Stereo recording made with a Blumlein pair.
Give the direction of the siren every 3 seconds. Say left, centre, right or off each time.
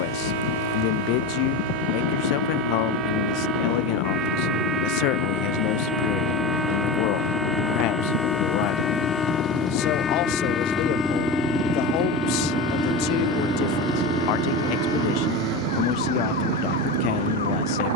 right, right, centre, left, left, left.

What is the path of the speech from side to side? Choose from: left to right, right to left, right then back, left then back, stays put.
stays put.